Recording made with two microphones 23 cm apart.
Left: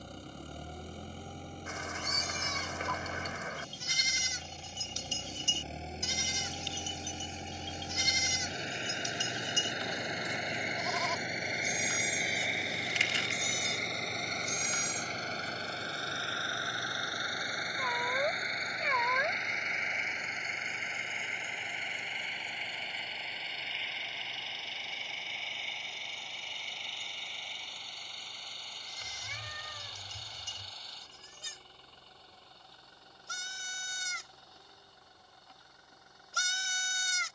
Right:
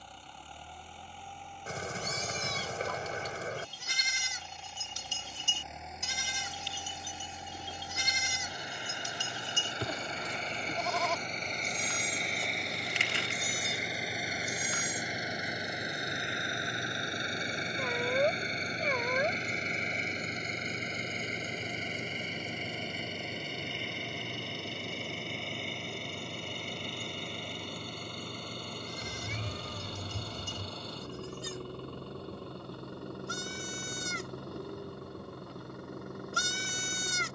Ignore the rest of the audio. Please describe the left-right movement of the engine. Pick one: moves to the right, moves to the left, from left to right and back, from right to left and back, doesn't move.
moves to the right.